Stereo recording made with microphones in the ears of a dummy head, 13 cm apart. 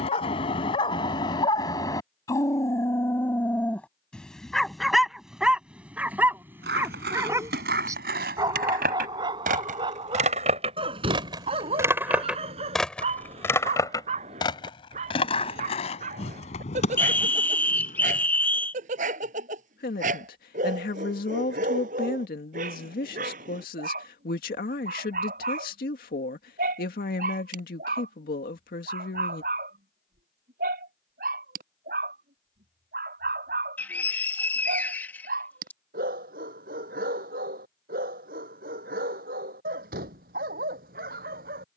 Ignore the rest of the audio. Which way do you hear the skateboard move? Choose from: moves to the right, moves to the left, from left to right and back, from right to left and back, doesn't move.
moves to the left.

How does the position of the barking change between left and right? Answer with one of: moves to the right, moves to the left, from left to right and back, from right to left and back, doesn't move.
moves to the right.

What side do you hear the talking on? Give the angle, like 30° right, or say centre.
70° left.